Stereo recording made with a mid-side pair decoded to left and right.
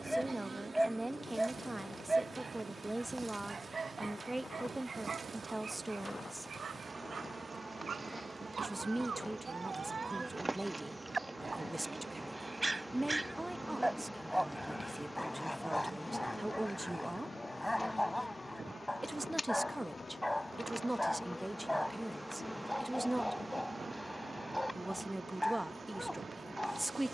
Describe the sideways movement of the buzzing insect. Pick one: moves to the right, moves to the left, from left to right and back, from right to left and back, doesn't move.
from right to left and back.